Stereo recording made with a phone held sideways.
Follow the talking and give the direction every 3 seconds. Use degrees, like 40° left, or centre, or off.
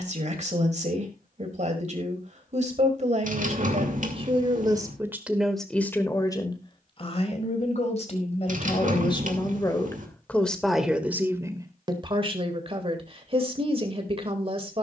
50° right, 30° right, 40° left, 10° left, 40° right.